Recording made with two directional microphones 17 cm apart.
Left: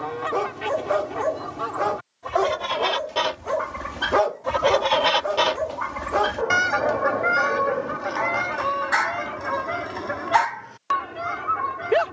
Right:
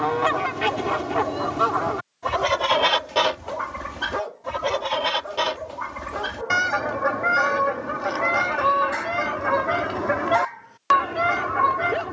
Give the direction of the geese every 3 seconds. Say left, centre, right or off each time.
right, centre, centre, right.